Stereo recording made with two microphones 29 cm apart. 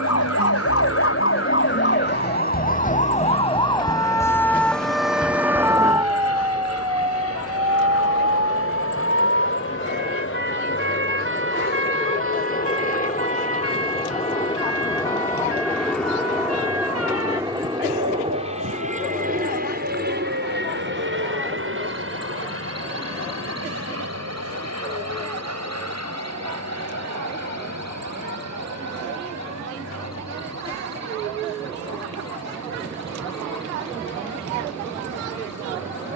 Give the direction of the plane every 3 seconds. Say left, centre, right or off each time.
left, left, left, left, left, centre, right, right, right, right, right, right.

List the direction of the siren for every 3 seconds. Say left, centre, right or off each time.
left, centre, right, right, right, right, right, right, right, right, right, right.